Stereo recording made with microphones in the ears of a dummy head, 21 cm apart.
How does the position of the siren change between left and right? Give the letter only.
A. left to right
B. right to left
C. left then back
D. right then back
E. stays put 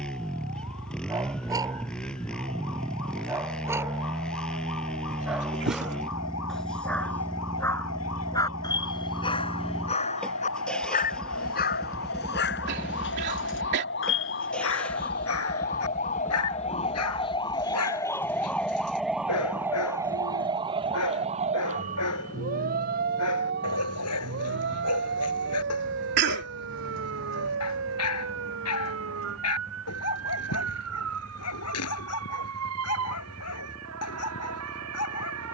A.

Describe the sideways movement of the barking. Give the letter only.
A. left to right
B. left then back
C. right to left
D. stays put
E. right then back
C.